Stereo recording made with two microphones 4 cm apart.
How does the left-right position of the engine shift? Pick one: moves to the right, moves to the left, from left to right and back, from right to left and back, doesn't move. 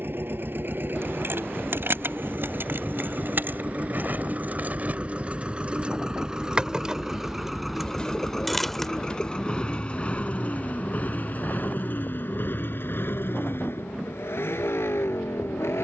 moves to the left.